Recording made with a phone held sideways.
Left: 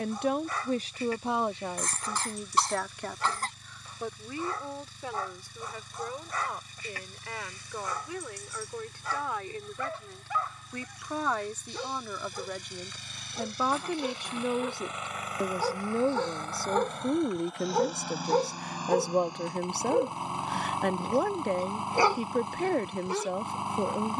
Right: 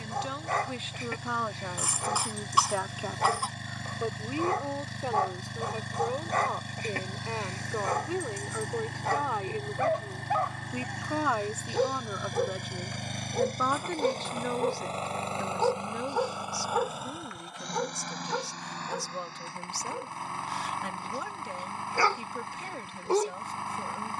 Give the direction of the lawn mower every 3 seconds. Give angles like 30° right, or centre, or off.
70° right, 70° right, 70° right, 70° right, 50° right, 10° right, 20° left, 20° left.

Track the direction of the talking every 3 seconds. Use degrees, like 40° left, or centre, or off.
20° left, 20° right, 30° right, 20° right, 10° left, 50° left, 60° left, 60° left.